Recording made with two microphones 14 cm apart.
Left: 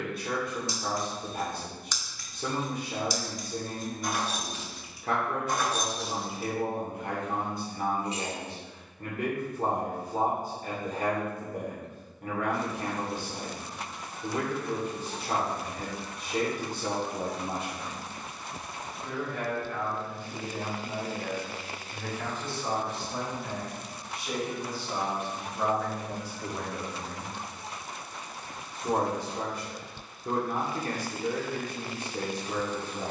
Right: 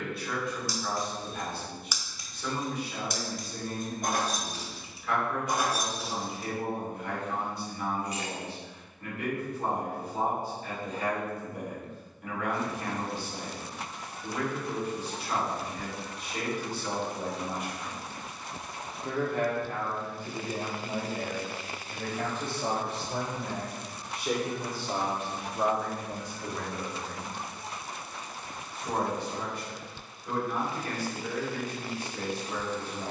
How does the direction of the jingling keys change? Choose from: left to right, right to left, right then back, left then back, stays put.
right then back.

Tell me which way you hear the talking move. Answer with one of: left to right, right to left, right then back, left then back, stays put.
right then back.